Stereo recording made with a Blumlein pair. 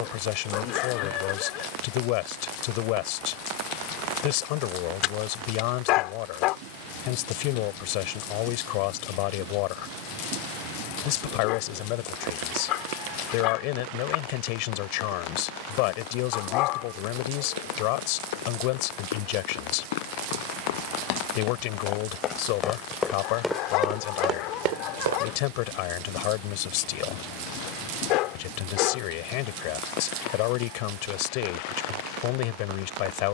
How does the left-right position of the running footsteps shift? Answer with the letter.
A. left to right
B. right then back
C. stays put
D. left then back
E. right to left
A.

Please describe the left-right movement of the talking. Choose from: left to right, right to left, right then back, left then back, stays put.
stays put.